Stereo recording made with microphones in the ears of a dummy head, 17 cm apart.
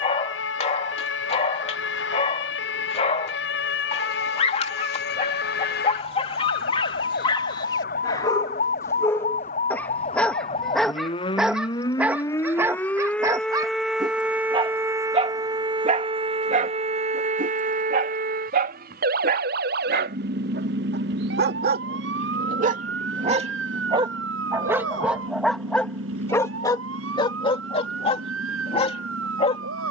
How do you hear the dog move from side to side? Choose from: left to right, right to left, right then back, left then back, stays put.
right then back.